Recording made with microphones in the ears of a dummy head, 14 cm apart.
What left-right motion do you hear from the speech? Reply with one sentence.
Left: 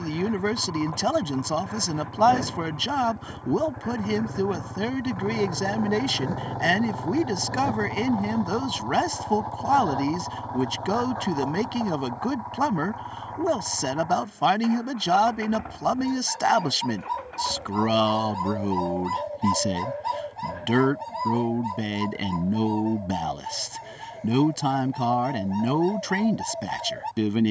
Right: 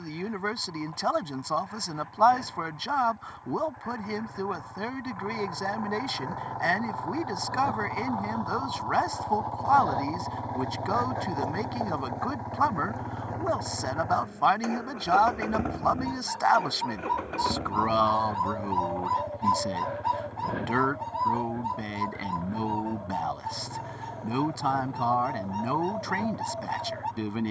In this clip you hear the speech stay in one place.